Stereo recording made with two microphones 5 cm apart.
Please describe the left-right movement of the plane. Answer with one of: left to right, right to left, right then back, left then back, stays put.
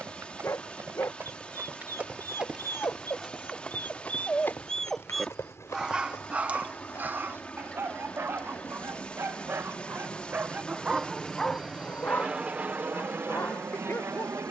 left to right.